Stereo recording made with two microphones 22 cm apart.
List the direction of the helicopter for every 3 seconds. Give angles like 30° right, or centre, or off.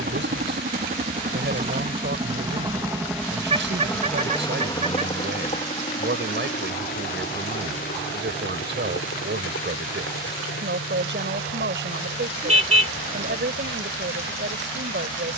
30° right, 10° left, 40° left, 60° left, 60° left.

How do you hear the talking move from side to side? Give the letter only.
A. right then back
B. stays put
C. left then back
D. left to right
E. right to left
B.